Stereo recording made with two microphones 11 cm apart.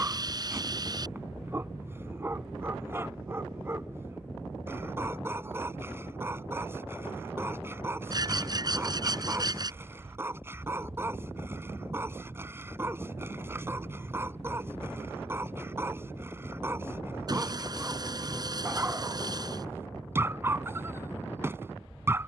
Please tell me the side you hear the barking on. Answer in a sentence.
In this clip you hear the barking on the right.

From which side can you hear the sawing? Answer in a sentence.
In this clip you hear the sawing on the right.